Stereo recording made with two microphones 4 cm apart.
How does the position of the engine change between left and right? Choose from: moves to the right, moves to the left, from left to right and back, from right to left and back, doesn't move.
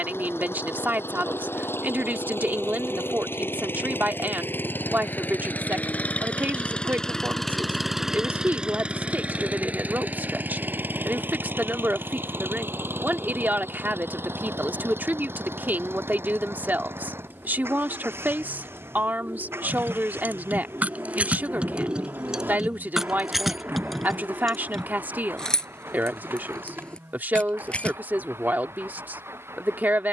moves to the right.